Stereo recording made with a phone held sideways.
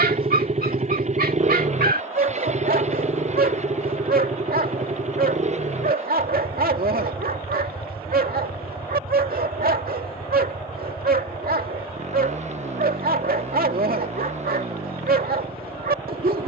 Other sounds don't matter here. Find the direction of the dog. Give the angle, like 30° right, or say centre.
80° right.